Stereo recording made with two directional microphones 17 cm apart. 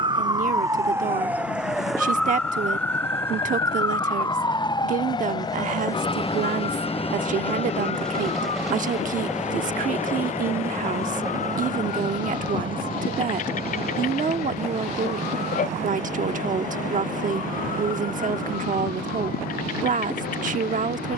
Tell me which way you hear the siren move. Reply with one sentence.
You can hear the siren travel towards the left.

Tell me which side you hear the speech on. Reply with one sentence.
You can hear the speech on the right.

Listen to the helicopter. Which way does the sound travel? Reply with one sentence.
You can hear the helicopter move from left to right.